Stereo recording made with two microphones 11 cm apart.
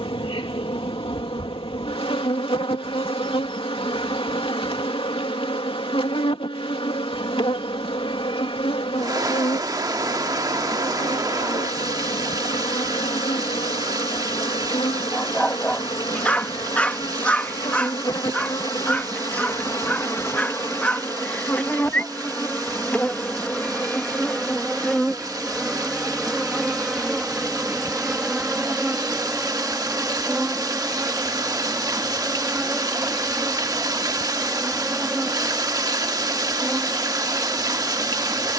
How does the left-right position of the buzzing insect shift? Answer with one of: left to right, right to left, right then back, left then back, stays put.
left to right.